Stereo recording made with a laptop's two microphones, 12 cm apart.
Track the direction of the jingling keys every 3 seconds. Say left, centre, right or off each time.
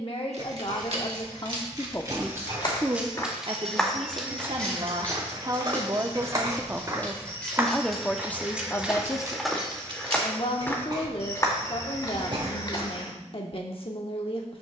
right, centre, centre, right, off.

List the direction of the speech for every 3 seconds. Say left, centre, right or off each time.
left, right, centre, left, left.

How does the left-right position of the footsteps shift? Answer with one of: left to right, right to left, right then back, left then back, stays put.
right then back.